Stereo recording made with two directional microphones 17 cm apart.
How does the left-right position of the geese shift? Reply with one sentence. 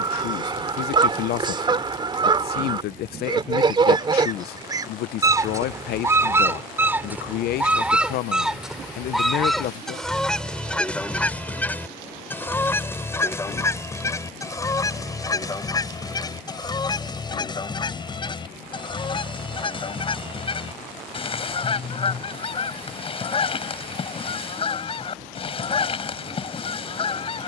In this clip you hear the geese go from the right side to the left.